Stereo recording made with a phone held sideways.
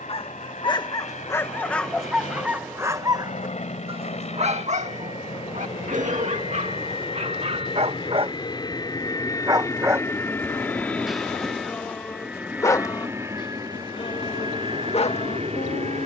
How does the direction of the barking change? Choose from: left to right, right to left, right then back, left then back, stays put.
right then back.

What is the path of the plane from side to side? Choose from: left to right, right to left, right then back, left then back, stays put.
left to right.